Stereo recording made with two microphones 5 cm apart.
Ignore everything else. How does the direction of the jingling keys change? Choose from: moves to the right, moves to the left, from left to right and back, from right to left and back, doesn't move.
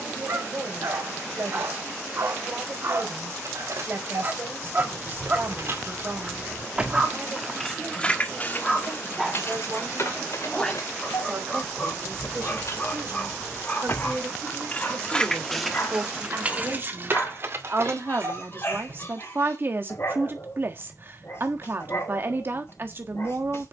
from right to left and back.